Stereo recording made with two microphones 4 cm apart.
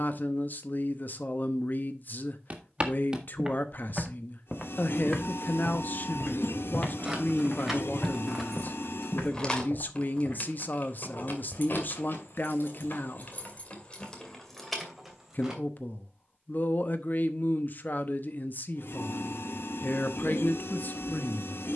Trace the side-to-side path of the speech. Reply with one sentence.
In this clip you hear the speech stay in one place.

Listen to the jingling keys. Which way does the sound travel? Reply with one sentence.
In this clip you hear the jingling keys go left and come back.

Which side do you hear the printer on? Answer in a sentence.
In this clip you hear the printer on the left.